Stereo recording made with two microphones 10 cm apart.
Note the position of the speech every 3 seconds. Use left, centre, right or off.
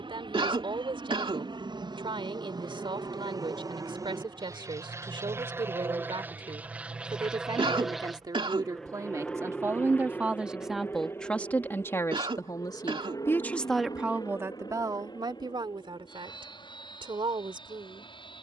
right, right, right, centre, centre, right.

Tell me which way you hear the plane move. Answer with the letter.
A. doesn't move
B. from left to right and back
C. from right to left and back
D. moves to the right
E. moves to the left
E.